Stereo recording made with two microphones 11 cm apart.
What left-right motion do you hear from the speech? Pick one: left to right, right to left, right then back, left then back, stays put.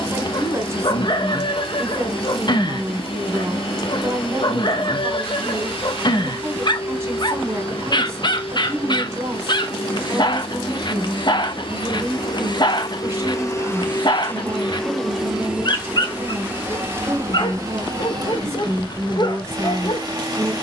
stays put.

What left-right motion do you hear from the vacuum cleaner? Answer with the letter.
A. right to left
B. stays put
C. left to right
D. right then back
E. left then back
C.